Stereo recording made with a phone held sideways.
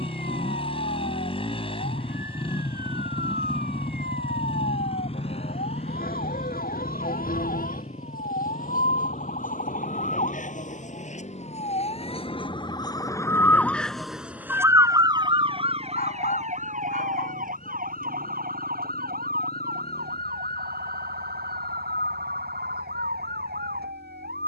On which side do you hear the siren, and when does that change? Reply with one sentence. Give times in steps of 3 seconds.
You can hear the siren on the left from 0 s, in the centre from 12 s and on the right from 15 s.